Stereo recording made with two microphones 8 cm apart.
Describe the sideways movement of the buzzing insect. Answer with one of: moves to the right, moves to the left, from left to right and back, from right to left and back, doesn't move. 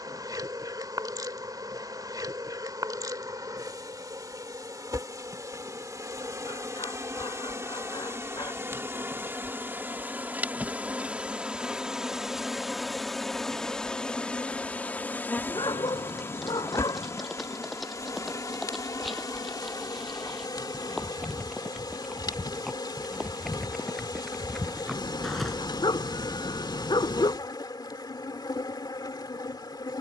moves to the left.